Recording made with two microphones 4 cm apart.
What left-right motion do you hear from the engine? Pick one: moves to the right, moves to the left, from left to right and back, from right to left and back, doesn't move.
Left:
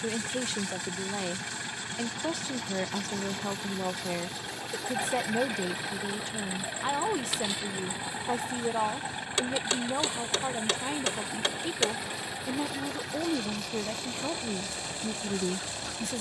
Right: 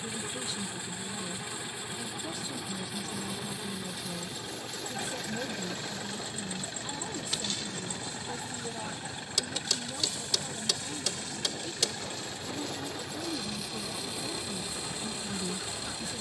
doesn't move.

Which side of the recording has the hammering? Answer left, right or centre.
left.